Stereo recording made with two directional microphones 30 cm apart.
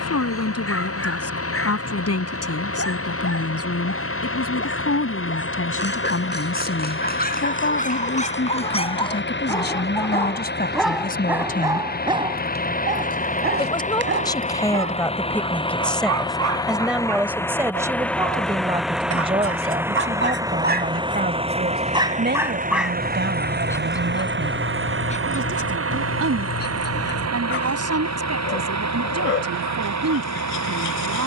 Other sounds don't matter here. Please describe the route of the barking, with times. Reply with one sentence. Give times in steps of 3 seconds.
In this clip you hear the barking on the left from 0 s, in the centre from 9 s, on the right from 12 s, in the centre from 21 s and on the left from 24 s.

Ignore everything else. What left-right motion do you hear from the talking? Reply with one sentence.
In this clip you hear the talking move from left to right.